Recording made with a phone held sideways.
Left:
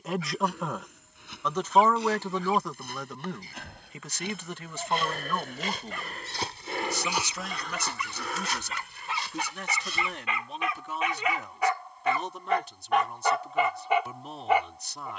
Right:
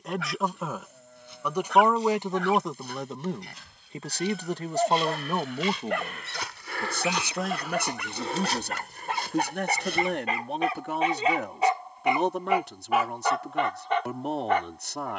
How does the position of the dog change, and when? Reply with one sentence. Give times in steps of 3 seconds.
In this clip you hear the dog on the right from 0 s and in the centre from 12 s.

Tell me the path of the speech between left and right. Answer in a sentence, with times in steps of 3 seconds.
In this clip you hear the speech in the centre from 0 s and on the right from 3 s.